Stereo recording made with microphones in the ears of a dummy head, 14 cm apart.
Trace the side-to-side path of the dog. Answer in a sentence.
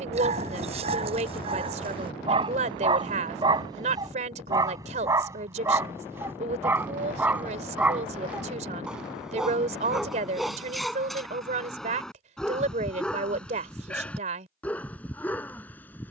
You can hear the dog go from the right side to the left.